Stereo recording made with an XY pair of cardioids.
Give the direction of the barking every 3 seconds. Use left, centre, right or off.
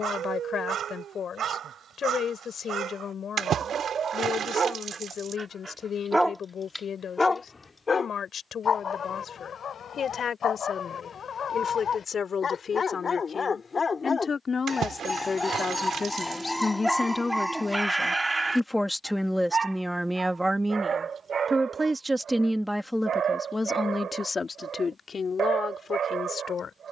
right, right, left, left, left, centre, right, right, right.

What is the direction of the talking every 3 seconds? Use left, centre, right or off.
left, left, left, left, left, left, centre, centre, left.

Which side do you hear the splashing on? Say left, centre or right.
right.